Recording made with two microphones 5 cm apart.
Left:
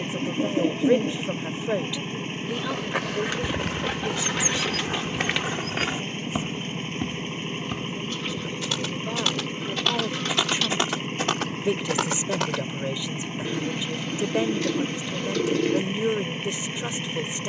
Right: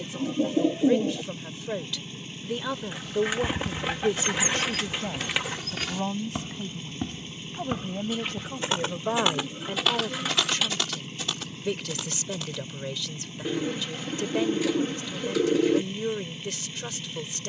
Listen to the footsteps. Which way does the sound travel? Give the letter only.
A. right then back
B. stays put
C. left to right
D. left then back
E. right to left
A.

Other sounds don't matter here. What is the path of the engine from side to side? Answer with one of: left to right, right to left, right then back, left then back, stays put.
stays put.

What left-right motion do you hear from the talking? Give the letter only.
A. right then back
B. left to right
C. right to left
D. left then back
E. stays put
A.